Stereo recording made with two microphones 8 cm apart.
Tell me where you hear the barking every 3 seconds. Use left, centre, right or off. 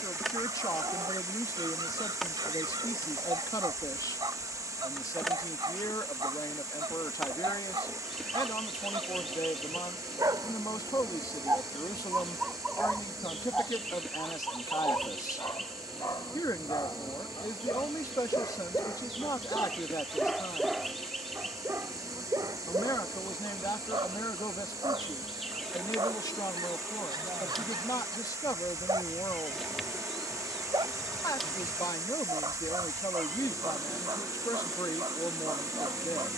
right, right, right, right, centre, left, left, right, right, right, right, right.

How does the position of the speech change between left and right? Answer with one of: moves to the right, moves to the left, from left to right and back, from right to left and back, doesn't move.
doesn't move.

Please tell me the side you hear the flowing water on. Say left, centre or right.
right.